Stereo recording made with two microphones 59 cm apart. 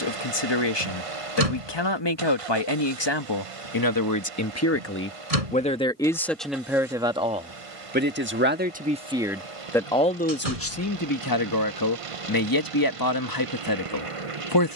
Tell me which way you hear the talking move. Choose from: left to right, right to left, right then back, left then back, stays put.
right then back.